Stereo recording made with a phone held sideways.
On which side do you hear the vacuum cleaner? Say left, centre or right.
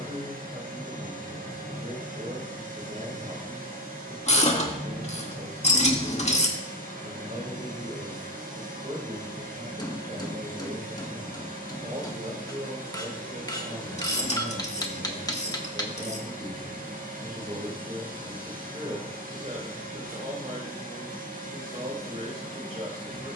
right.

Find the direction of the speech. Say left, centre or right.
right.